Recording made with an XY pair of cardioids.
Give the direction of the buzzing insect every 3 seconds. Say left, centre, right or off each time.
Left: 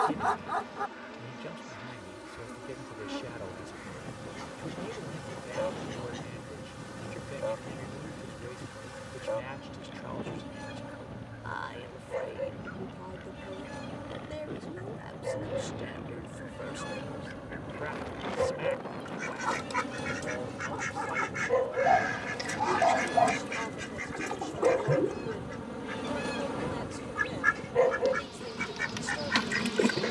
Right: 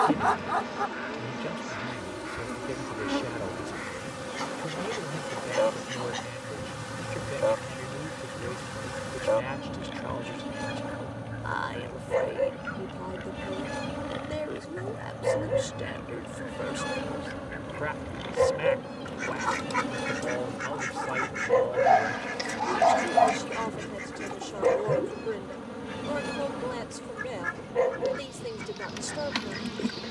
right, right, right, right, right, right, right, right, centre, centre.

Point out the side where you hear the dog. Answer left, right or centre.
right.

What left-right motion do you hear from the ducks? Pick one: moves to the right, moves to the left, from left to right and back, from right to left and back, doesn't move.
moves to the left.